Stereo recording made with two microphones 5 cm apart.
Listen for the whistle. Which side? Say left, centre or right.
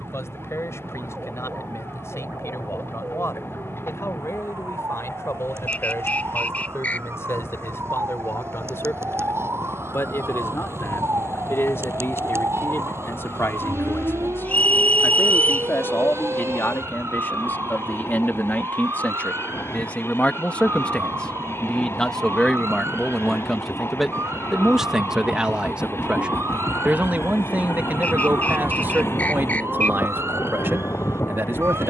left.